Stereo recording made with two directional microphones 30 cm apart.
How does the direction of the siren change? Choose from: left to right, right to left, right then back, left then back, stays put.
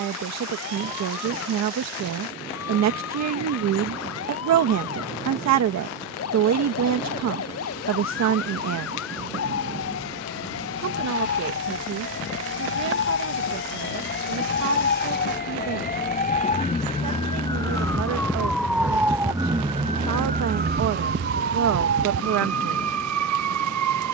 left to right.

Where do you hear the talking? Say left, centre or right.
right.